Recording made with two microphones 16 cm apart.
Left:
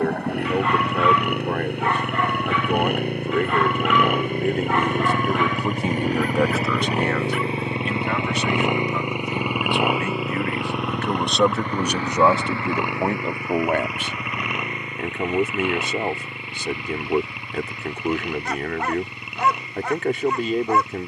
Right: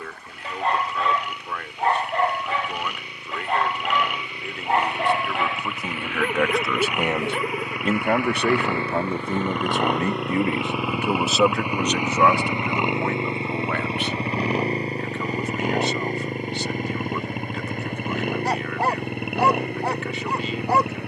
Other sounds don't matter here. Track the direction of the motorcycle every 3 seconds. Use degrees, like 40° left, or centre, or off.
60° left, 50° left, 30° left, centre, 20° right, 40° right, 50° right.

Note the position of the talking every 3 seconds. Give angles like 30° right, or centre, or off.
50° left, 40° left, 30° right, 20° right, 30° left, 50° left, 50° left.